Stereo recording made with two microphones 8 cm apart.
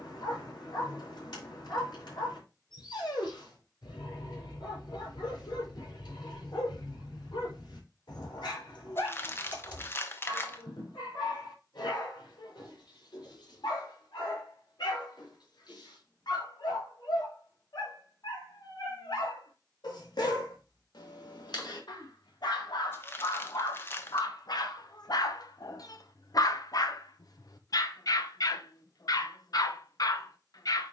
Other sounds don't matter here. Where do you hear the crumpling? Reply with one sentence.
You can hear the crumpling on the left.